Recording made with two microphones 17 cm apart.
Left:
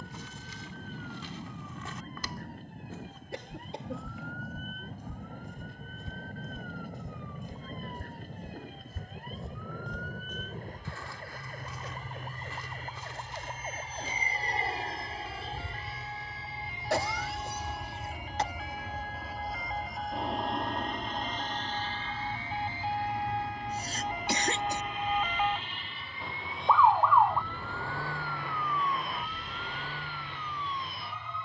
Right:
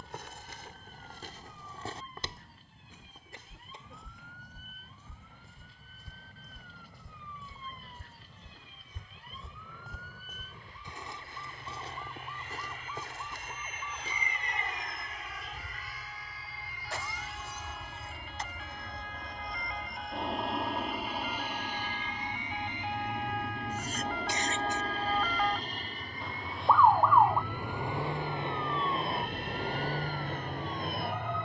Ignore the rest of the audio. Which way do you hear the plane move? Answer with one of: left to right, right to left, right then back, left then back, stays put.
left to right.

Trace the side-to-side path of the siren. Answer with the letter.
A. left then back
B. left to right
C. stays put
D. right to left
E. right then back
B.